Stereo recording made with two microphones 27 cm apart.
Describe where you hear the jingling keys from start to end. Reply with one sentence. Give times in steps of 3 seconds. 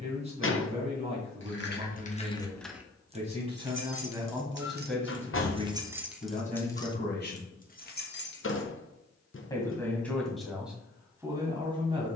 In this clip you hear the jingling keys on the left from 0 s, on the right from 3 s, on the left from 6 s and not at all from 9 s.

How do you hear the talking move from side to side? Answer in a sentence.
You can hear the talking go left and come back.